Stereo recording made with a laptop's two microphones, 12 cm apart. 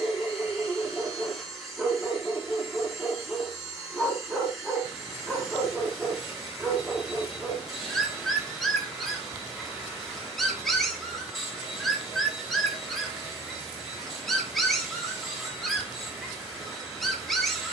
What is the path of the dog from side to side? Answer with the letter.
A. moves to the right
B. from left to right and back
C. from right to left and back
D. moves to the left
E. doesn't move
E.